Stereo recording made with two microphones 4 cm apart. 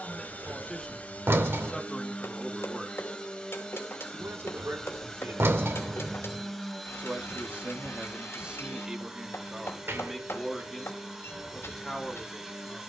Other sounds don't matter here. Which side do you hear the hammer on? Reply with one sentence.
In this clip you hear the hammer on the left.